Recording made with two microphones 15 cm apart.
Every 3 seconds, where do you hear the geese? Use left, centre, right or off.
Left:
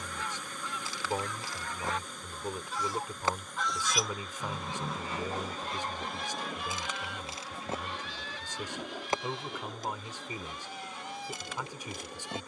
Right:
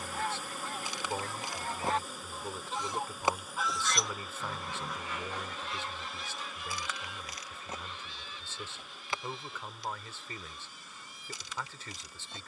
right, left, left, left.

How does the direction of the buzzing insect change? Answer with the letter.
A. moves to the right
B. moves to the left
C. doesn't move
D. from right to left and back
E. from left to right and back
B.